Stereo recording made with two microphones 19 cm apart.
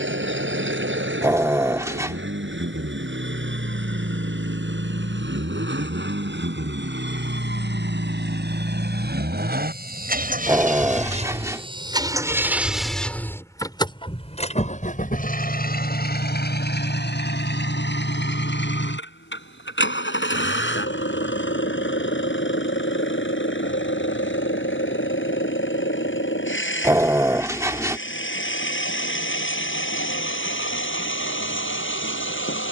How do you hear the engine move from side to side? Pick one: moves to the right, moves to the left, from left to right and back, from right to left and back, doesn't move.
moves to the left.